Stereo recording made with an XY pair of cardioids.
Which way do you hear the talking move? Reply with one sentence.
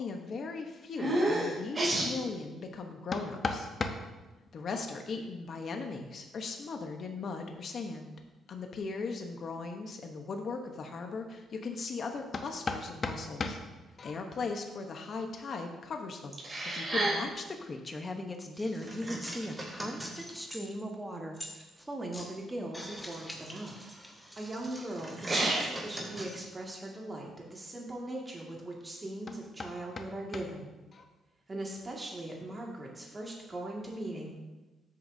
In this clip you hear the talking move from left to right.